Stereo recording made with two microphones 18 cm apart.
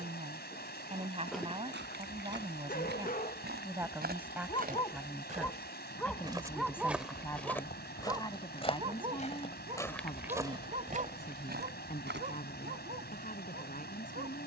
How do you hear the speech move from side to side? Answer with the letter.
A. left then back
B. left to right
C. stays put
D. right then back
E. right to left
E.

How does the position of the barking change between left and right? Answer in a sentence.
In this clip you hear the barking go left and come back.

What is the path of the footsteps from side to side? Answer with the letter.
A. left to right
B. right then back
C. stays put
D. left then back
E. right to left
D.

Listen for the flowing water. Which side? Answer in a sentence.
You can hear the flowing water on the left.